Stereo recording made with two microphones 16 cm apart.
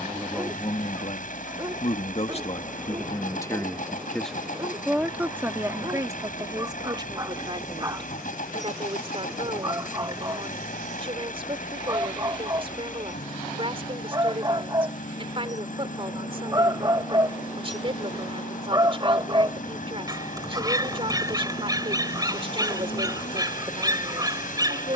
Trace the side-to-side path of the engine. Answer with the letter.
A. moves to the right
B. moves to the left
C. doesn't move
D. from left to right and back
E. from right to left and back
C.